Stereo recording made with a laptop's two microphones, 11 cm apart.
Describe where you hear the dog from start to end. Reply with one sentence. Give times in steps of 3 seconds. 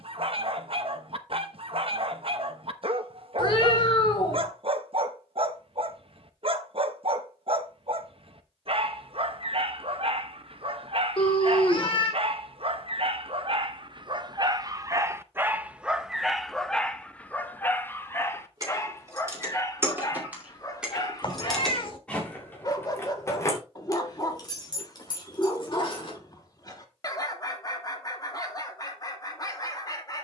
You can hear the dog on the right from 0 s, in the centre from 15 s and on the left from 18 s.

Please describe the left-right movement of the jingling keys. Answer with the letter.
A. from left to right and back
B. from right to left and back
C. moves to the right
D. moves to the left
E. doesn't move
D.